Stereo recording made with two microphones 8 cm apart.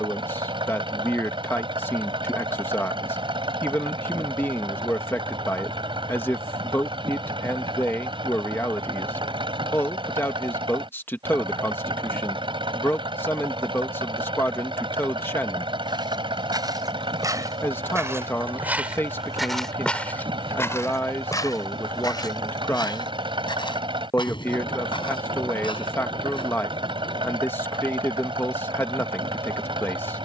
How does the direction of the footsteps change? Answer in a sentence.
You can hear the footsteps move from right to left.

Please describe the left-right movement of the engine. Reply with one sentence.
You can hear the engine stay in one place.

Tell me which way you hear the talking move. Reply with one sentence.
You can hear the talking stay put.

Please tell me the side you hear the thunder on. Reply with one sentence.
You can hear the thunder on the left.